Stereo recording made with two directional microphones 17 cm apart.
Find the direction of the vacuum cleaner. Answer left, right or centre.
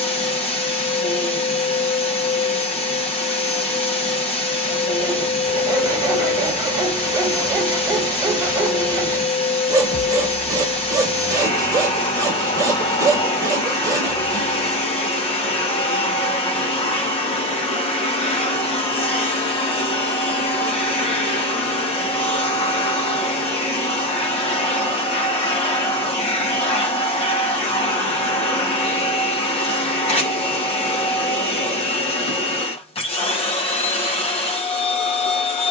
left.